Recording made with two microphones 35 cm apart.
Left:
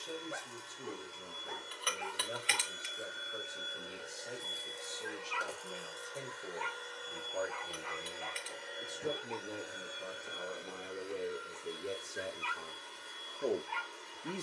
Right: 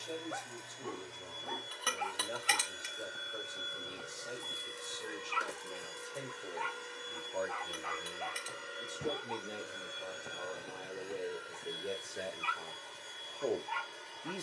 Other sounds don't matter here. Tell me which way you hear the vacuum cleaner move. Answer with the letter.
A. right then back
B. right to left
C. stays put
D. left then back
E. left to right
A.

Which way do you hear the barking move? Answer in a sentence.
In this clip you hear the barking stay put.